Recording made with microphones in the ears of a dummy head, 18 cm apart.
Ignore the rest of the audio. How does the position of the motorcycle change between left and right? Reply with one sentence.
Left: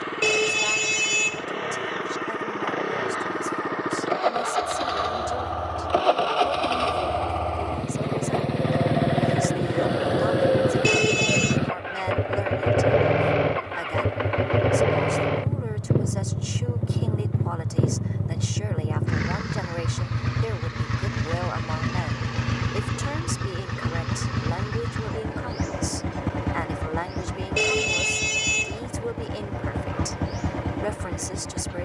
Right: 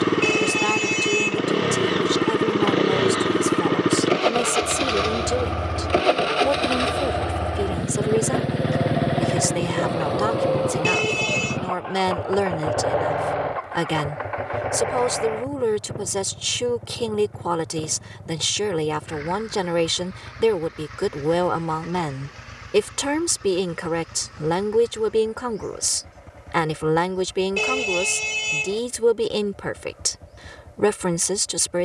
In this clip you hear the motorcycle go from the right side to the left.